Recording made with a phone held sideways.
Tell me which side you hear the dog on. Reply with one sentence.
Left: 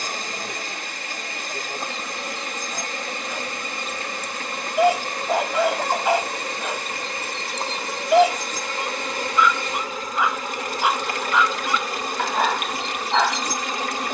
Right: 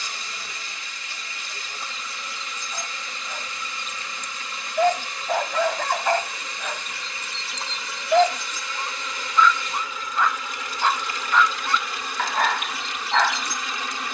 You can hear the dog in the centre.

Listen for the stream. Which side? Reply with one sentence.
In this clip you hear the stream on the left.